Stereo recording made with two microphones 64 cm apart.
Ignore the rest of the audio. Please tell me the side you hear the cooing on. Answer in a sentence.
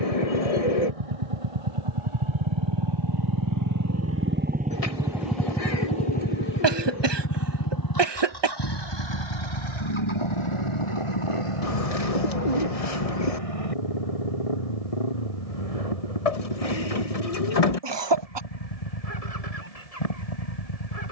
You can hear the cooing on the left.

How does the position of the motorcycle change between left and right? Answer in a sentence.
In this clip you hear the motorcycle go from the right side to the left.